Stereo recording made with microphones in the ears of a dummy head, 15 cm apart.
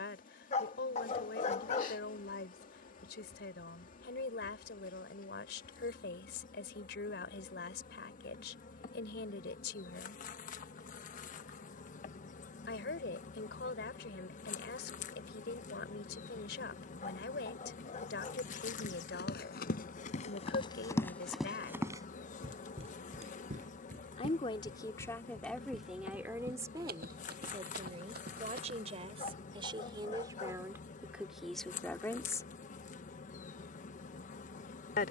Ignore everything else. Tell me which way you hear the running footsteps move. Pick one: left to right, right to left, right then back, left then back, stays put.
left to right.